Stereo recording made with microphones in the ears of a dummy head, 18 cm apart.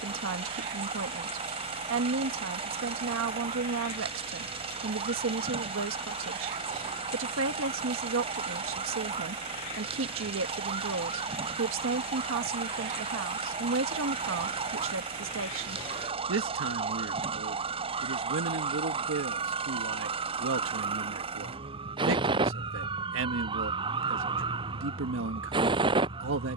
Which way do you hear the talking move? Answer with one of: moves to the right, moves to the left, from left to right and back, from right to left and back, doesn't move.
doesn't move.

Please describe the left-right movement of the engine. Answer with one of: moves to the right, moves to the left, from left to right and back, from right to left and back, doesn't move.
doesn't move.